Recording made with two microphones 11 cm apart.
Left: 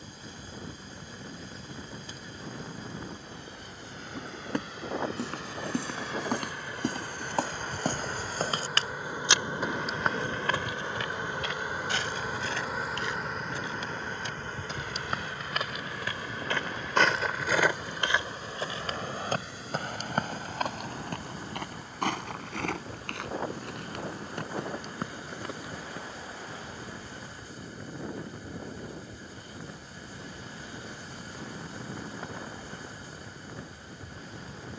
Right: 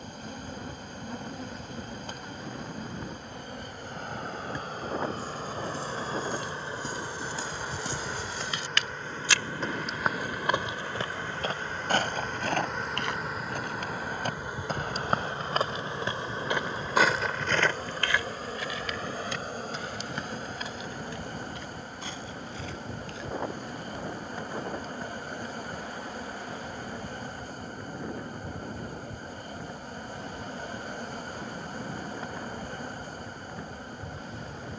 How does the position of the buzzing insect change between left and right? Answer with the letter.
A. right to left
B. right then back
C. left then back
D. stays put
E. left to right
C.